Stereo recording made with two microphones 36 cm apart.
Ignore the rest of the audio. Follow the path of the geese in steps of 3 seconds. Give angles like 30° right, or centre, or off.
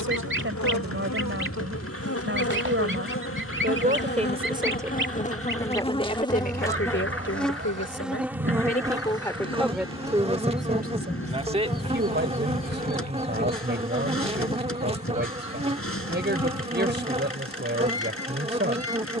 30° right, 30° right, 30° right, centre, 30° left, 40° left, 40° left.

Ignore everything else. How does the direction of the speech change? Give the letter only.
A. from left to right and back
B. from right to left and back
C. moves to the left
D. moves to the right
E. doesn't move
B.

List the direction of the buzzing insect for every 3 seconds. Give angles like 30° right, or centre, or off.
40° left, 30° left, centre, 20° right, 20° right, 20° right, 20° right.